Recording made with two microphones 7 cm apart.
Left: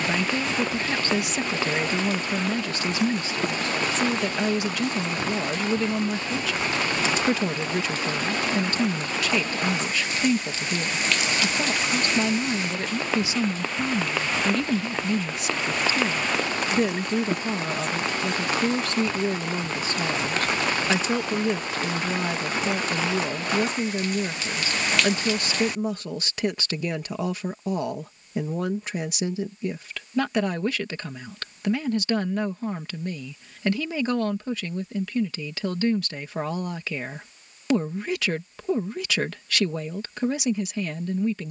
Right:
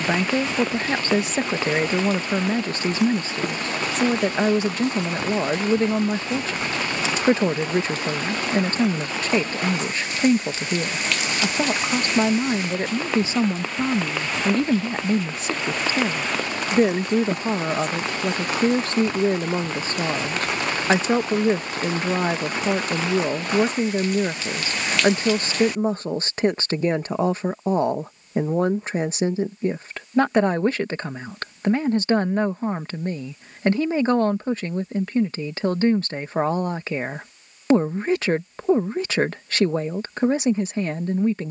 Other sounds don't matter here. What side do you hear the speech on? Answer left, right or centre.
right.